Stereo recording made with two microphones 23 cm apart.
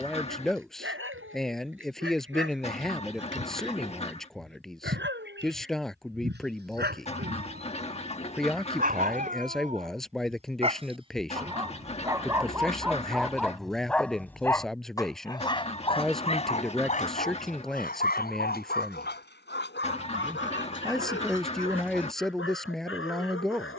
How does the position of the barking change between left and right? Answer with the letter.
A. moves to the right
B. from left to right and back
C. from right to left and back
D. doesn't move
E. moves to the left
E.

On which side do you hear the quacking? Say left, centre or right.
left.